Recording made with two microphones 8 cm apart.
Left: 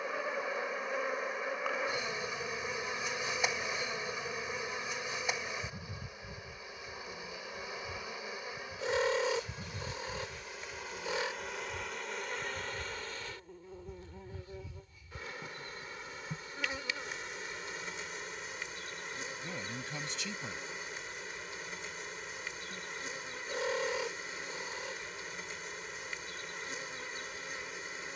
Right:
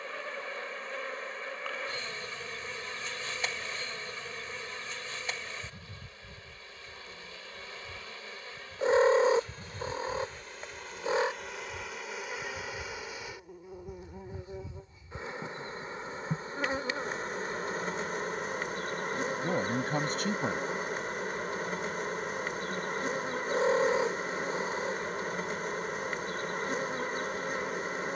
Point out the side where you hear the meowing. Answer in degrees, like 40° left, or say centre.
30° right.